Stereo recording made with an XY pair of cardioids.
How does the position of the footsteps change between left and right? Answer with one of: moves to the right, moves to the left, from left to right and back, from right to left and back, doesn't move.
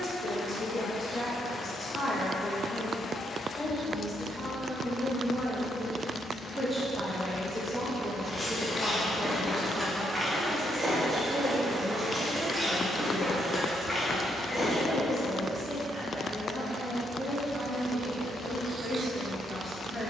from left to right and back.